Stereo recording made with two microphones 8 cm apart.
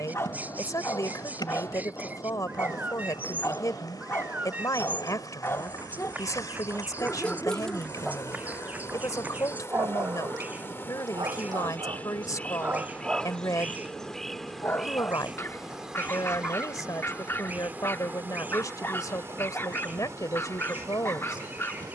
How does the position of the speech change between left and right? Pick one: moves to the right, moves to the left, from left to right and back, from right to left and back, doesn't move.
doesn't move.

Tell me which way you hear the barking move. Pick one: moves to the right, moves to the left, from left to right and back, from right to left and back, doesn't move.
from left to right and back.